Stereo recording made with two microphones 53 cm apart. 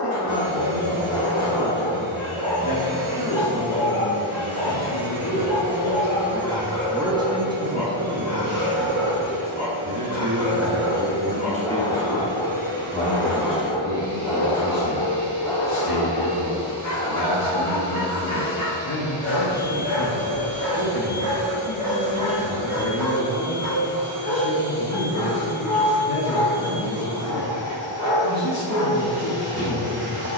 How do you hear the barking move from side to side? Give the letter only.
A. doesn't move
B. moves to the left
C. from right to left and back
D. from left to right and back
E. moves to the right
A.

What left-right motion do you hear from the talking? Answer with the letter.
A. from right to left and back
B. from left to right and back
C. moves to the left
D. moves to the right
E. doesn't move
B.